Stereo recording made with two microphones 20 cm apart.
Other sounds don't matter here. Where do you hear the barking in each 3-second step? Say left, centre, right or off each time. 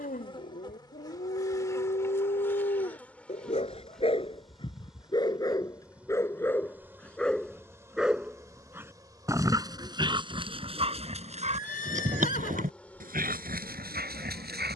left, left, centre, right, right.